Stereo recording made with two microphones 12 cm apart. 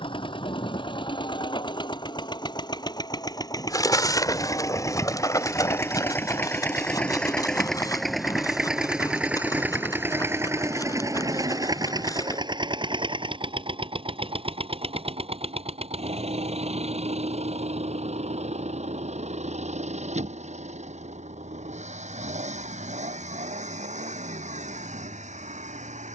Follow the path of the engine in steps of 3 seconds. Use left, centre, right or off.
left, left, centre, right, right, right, right, right, right.